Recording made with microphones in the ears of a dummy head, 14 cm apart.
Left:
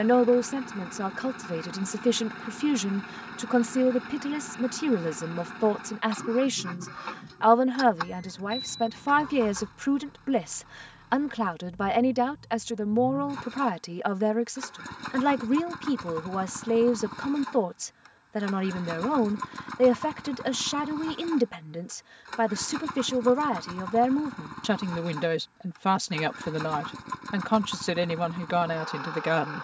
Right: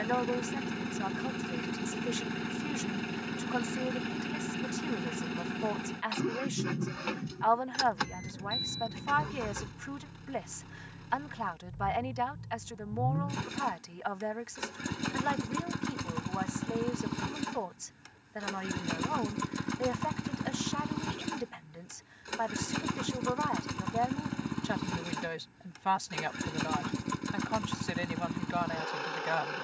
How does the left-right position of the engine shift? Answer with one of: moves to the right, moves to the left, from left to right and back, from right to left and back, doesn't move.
doesn't move.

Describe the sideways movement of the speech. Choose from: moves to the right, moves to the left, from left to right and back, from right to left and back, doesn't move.
doesn't move.